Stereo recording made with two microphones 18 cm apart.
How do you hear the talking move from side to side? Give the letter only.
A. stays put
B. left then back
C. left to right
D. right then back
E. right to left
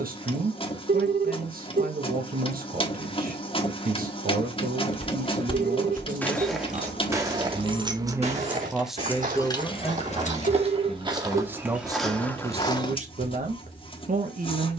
B.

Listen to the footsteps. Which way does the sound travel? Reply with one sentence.
You can hear the footsteps go right and come back.